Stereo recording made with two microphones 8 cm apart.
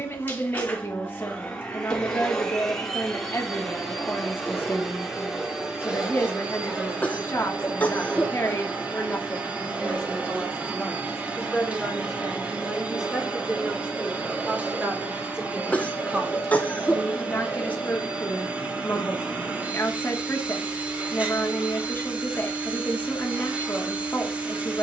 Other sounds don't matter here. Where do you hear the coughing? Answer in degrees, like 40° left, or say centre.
20° left.